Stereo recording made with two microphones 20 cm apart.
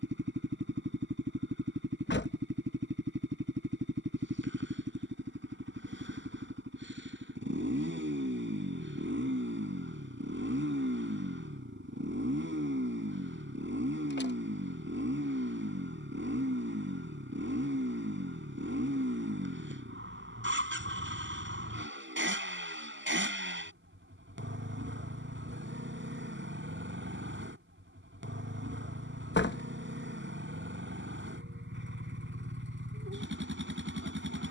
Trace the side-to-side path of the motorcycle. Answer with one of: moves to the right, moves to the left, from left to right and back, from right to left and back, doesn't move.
doesn't move.